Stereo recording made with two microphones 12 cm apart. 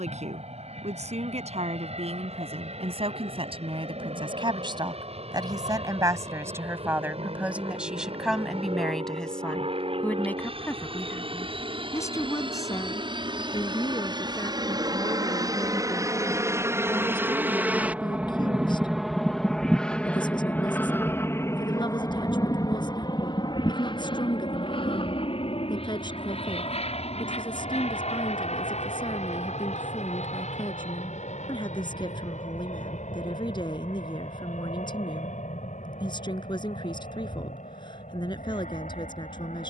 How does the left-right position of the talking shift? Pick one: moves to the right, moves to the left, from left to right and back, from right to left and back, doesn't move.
moves to the left.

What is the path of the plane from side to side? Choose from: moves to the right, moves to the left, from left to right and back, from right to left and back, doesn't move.
moves to the left.